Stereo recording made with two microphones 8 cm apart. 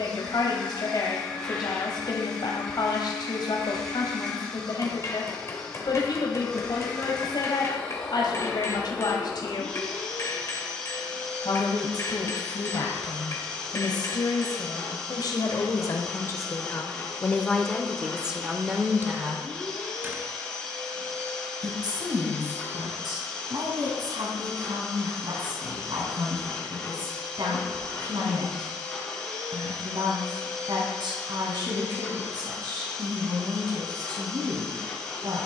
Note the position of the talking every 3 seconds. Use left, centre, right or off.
left, left, left, left, left, left, right, right, right, right, right, right.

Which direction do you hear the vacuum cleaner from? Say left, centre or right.
centre.